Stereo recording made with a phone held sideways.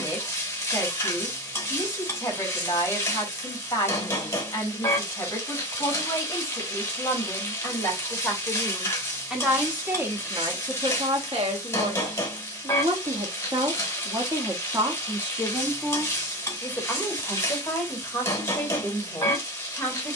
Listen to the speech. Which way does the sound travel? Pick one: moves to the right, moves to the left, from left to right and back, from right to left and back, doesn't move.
from left to right and back.